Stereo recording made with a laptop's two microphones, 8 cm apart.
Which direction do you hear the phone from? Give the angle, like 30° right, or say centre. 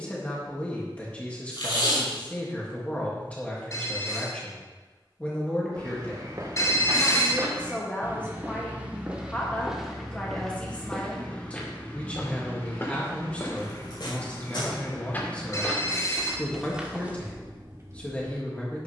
40° left.